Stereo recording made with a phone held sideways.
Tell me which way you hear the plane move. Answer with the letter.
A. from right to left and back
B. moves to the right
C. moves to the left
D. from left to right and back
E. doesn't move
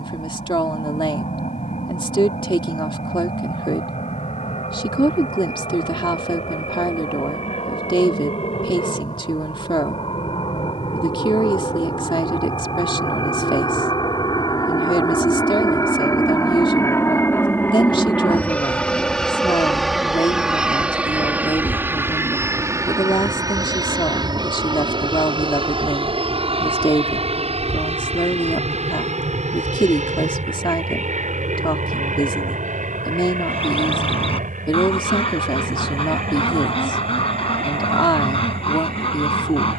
B.